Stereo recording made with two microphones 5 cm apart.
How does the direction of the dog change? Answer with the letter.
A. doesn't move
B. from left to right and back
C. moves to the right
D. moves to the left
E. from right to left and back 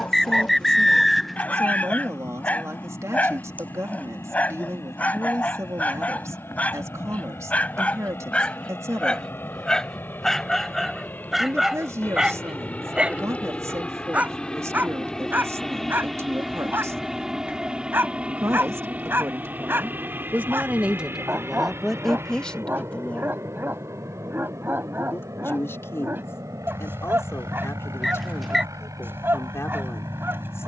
C.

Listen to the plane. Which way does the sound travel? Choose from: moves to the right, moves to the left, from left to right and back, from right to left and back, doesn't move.
moves to the right.